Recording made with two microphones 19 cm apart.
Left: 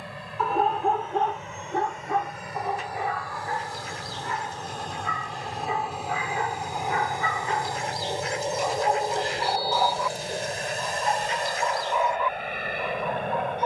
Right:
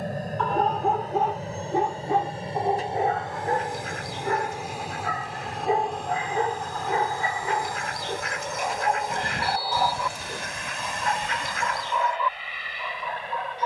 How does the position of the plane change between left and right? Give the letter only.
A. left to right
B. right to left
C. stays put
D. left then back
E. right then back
B.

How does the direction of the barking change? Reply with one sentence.
In this clip you hear the barking go right and come back.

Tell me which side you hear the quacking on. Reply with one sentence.
In this clip you hear the quacking on the right.